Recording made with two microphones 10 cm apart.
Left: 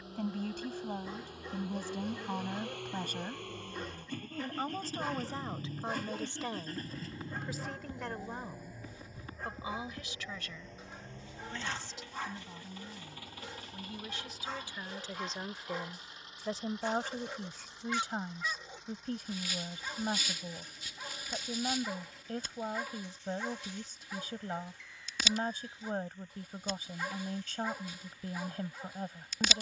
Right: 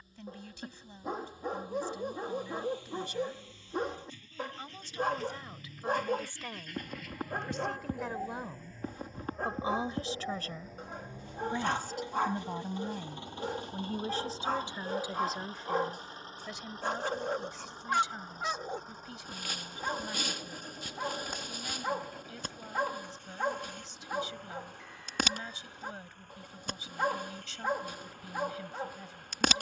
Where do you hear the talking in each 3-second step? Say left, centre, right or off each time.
left, left, centre, right, right, left, left, left, left, left.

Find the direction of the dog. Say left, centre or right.
right.